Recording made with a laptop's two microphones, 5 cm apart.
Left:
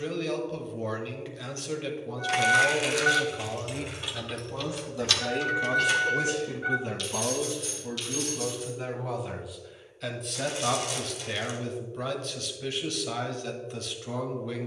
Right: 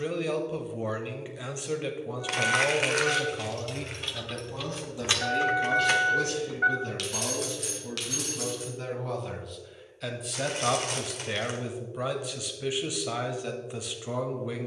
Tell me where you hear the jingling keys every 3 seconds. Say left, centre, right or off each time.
left, centre, right, off, off.